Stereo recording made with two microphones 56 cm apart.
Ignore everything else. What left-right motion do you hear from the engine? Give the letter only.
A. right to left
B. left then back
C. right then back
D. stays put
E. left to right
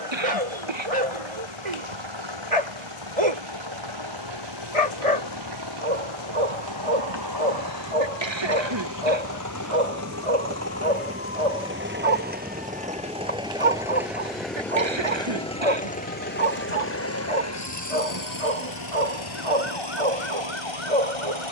A.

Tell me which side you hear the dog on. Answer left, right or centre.
right.